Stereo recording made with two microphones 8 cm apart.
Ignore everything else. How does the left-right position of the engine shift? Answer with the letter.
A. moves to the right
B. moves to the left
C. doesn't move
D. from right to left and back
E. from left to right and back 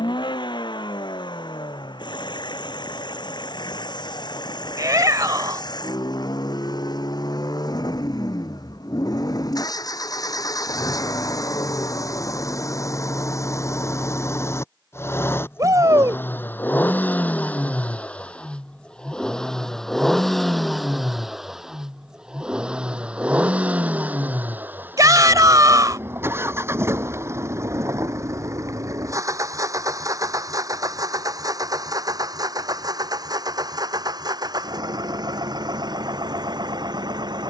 A.